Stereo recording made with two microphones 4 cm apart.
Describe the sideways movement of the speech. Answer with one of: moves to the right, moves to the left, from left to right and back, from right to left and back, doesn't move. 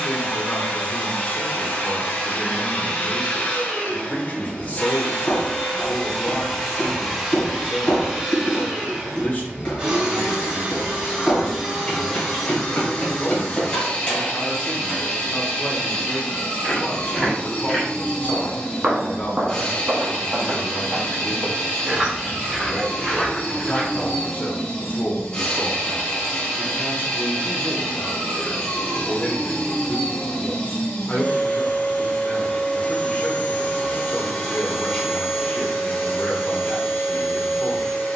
doesn't move.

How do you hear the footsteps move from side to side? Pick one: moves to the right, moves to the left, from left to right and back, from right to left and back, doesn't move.
from left to right and back.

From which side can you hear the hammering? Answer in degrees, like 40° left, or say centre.
30° left.